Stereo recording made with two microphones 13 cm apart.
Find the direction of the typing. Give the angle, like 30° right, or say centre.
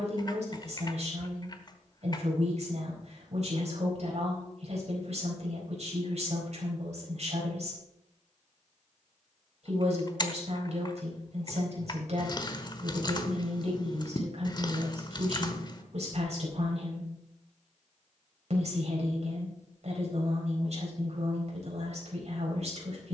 30° left.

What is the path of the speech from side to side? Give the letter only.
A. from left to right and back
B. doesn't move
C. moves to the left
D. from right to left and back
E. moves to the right
B.